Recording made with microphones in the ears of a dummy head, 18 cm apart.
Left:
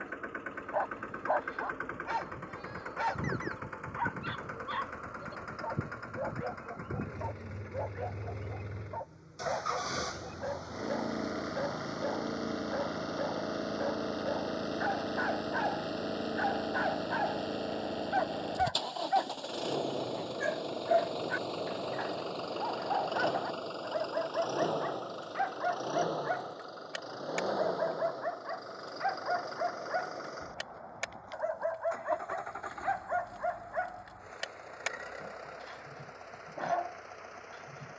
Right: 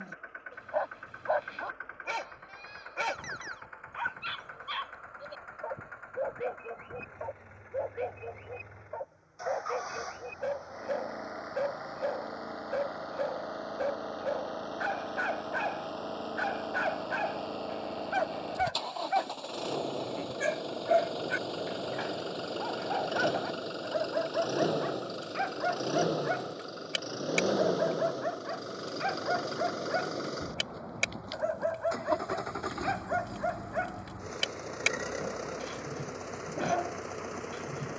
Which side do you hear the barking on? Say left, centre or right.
right.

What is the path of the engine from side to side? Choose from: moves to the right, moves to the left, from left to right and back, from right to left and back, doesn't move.
moves to the right.